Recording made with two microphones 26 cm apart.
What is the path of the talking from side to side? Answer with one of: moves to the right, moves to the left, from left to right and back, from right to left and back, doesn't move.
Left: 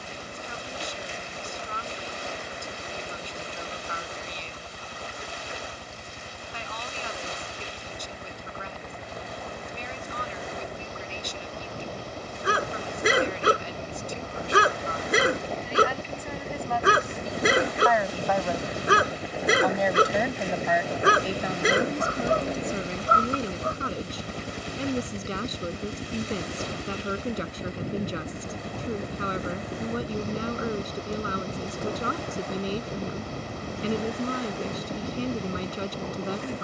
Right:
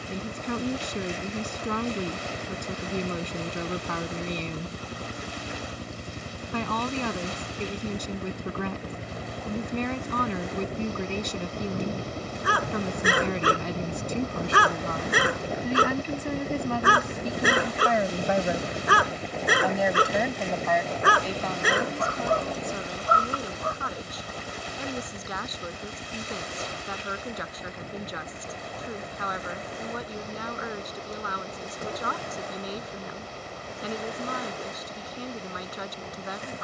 moves to the left.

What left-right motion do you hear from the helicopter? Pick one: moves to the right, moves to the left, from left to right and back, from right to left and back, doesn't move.
moves to the left.